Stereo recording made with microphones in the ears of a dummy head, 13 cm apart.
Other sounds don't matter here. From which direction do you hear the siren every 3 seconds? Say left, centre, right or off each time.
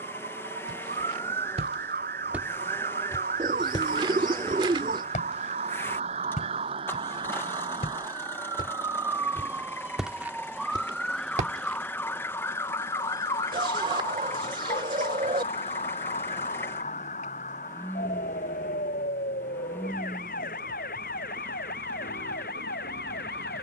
right, right, right, centre, left, left, left, left.